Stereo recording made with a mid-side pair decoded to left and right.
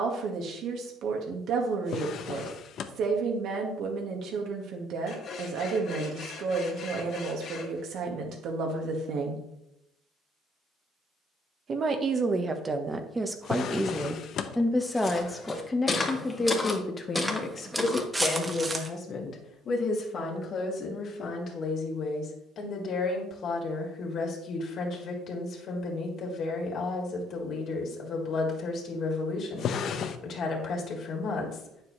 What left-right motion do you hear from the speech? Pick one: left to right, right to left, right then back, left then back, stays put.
right to left.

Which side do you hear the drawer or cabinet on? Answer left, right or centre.
left.